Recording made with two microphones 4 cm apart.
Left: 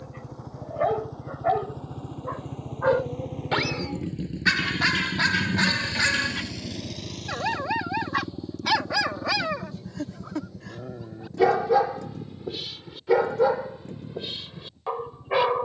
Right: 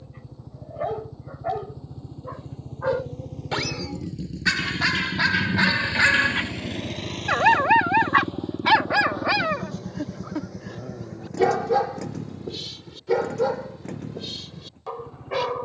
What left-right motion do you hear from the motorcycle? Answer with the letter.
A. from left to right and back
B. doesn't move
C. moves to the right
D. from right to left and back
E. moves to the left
C.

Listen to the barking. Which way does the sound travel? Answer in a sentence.
You can hear the barking go right and come back.